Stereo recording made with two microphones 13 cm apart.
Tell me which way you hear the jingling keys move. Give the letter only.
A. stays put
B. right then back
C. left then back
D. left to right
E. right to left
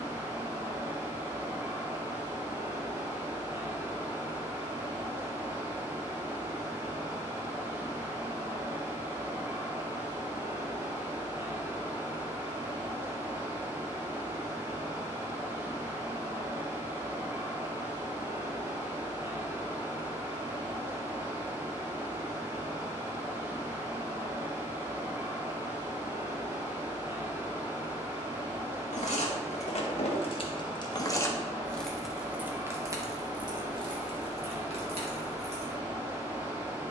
D.